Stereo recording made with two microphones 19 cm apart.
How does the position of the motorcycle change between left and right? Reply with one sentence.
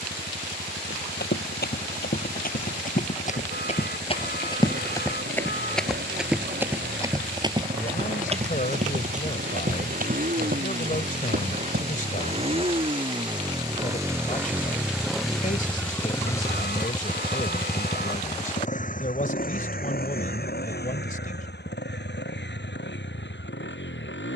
In this clip you hear the motorcycle move from right to left.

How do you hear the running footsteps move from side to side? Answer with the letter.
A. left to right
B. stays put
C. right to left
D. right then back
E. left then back
A.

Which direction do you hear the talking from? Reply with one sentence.
In this clip you hear the talking on the left.